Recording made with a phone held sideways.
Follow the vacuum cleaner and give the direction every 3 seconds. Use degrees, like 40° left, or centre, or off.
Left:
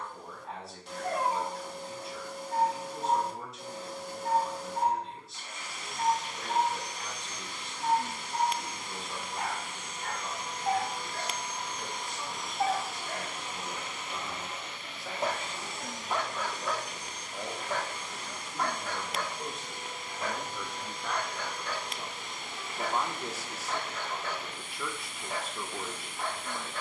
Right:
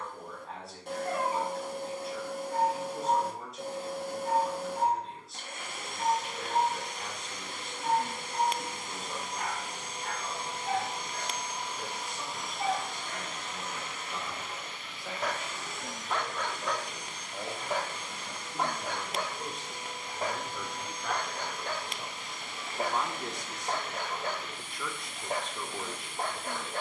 60° right, 60° right, 60° right, 30° right, 10° left, 40° left, 50° left, 50° left, 50° left.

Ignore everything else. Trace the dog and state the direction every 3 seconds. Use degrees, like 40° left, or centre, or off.
70° left, 70° left, 70° left, 70° left, 40° left, 10° left, 30° right, 50° right, 50° right.